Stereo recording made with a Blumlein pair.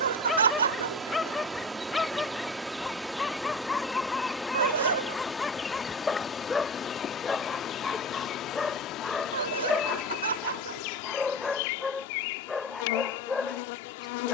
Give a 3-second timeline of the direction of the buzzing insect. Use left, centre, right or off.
centre, centre, left, left, left.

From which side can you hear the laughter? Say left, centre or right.
right.